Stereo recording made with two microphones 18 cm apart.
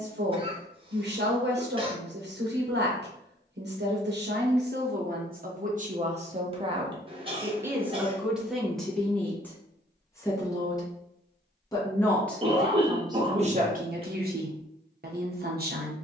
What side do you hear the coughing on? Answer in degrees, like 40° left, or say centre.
30° right.